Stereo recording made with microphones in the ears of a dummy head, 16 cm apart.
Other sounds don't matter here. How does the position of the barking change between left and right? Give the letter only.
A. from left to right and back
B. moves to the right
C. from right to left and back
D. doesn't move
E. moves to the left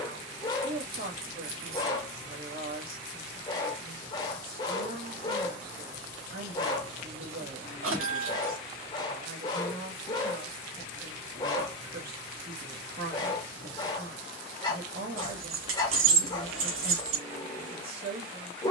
D.